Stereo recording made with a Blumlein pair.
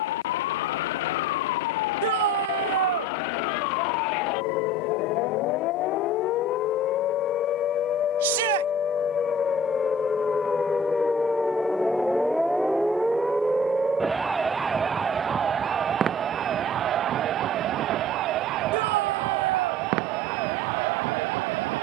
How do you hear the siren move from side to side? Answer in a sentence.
In this clip you hear the siren move from left to right.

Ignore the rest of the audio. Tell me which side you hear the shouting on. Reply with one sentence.
You can hear the shouting on the right.